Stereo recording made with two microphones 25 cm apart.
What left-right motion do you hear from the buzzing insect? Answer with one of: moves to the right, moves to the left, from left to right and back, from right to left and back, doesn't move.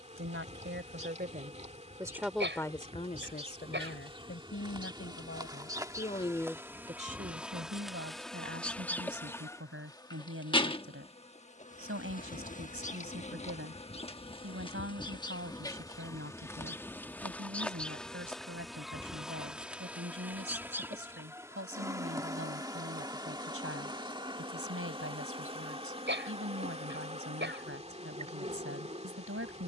from right to left and back.